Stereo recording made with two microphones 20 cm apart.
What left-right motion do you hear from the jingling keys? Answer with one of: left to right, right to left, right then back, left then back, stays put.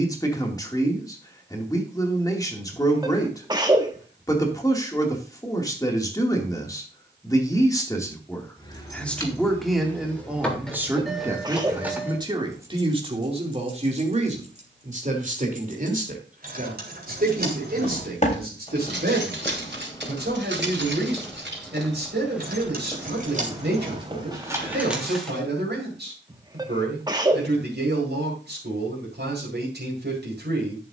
right then back.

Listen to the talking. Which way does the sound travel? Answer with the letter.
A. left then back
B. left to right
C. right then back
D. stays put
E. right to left
B.